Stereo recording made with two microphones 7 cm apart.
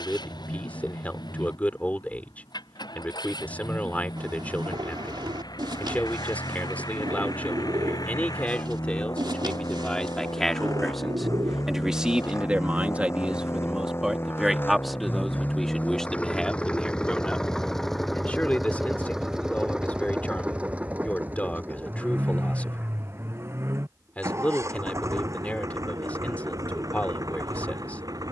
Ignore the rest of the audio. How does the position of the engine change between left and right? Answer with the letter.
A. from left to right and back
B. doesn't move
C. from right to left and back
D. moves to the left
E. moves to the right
E.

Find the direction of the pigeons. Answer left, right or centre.
right.